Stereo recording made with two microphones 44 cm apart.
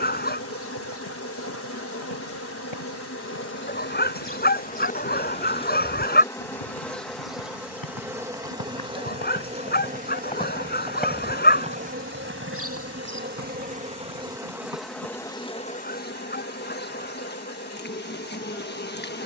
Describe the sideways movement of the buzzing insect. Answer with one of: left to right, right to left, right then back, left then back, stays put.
right then back.